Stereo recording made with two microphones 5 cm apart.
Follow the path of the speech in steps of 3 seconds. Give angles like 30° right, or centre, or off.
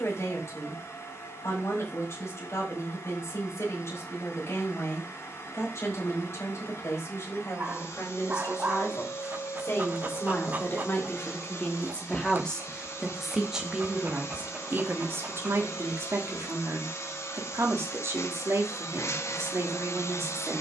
60° left, 60° left, 60° left, 40° left, 10° right, 50° right, 60° right.